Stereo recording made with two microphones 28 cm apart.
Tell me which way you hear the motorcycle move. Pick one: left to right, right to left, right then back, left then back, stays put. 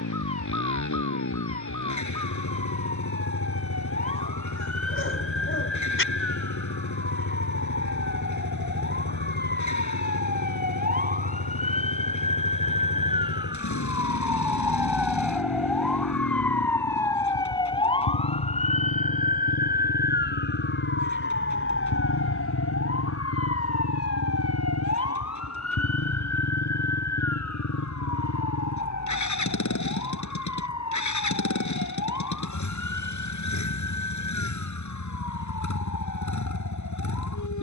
stays put.